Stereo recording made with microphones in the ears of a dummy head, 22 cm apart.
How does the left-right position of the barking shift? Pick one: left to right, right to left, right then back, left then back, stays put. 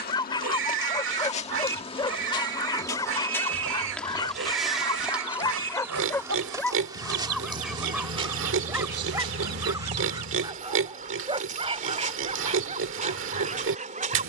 left to right.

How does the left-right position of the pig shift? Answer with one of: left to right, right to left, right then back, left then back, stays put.
stays put.